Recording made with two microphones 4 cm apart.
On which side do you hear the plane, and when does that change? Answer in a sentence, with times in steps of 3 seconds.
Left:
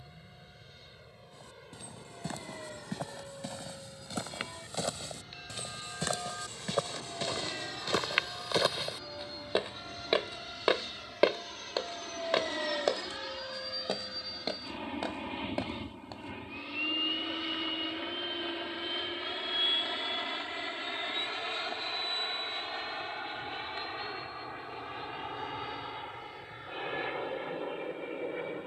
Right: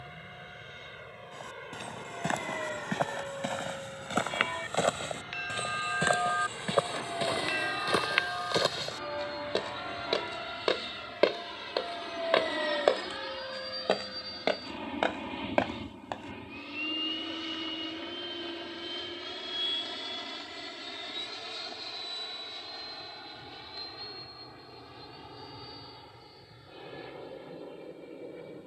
In this clip you hear the plane on the right from 0 s, in the centre from 12 s and on the left from 18 s.